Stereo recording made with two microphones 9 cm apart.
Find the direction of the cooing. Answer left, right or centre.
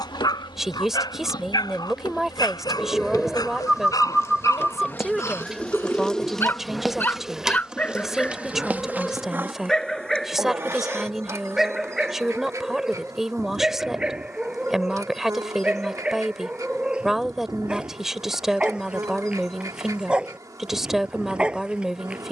centre.